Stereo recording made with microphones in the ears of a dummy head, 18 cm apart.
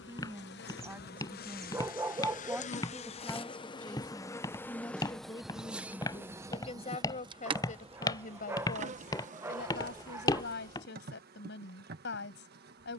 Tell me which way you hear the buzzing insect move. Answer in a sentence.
In this clip you hear the buzzing insect move from left to right.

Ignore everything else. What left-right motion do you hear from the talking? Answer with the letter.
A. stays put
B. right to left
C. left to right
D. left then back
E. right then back
B.